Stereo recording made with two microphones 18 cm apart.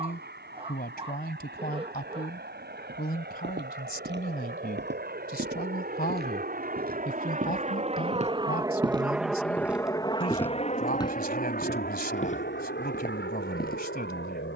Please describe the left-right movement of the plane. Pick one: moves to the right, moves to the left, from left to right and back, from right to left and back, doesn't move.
moves to the left.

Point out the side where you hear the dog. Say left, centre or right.
right.